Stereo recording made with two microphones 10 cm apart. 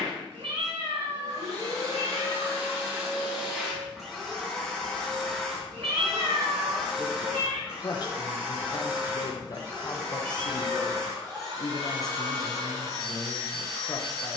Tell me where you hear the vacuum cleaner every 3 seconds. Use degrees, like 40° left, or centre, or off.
40° right, centre, 10° right, 30° right, 40° right.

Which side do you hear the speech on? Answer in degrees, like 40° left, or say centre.
40° left.